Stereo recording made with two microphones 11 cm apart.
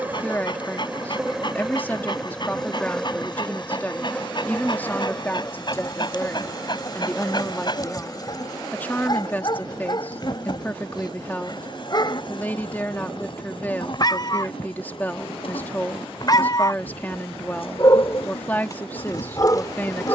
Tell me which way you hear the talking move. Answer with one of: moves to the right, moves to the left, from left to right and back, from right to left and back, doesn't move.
doesn't move.